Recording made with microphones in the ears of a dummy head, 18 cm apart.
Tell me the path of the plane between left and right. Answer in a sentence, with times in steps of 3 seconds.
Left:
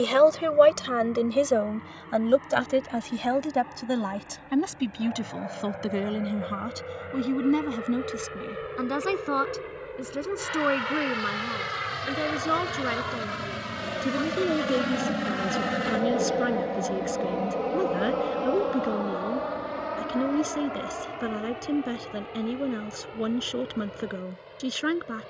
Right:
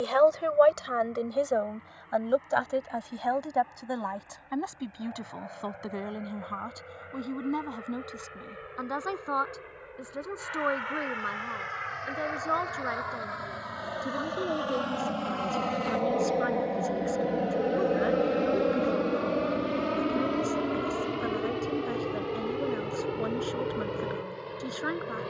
In this clip you hear the plane on the left from 0 s, in the centre from 15 s and on the right from 18 s.